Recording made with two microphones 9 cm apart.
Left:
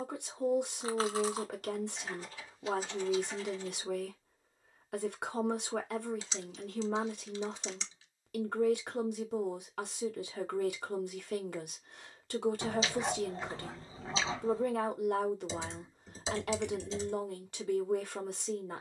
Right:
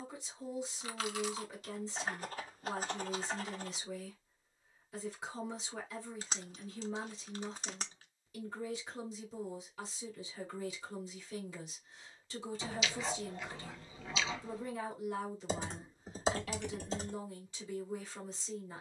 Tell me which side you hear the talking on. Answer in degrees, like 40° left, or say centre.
70° left.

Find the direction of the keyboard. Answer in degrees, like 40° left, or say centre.
50° right.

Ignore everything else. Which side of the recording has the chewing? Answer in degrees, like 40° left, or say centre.
30° left.